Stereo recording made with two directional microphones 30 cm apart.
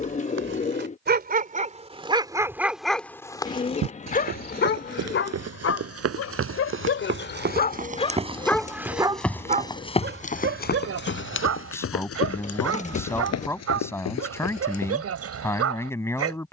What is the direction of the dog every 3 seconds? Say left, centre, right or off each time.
right, left, left, right, right, right.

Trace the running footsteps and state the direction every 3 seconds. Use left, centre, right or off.
off, right, right, left, left, off.